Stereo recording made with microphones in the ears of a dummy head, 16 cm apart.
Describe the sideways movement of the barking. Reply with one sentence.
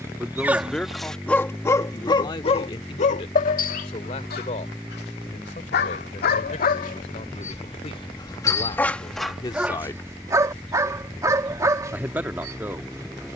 You can hear the barking go left and come back.